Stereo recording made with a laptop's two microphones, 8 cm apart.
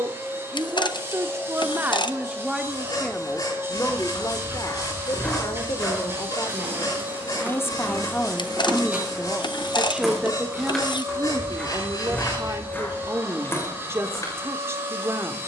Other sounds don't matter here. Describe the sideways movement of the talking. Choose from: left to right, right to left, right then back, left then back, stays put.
left then back.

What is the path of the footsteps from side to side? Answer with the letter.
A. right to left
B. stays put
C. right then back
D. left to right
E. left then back
C.